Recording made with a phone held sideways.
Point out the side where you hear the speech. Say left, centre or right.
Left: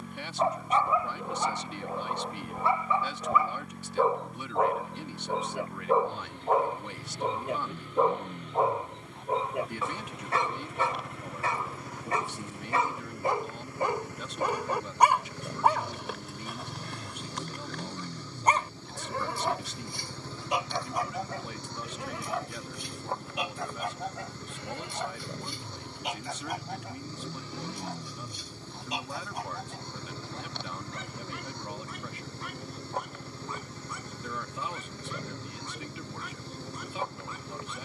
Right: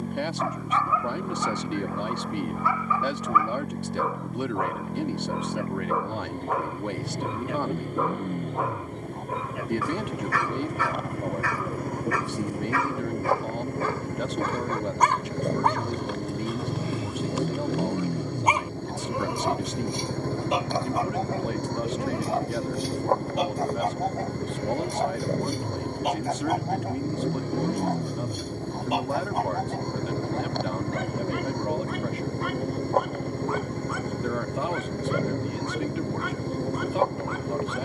right.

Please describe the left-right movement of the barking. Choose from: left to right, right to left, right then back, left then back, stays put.
left to right.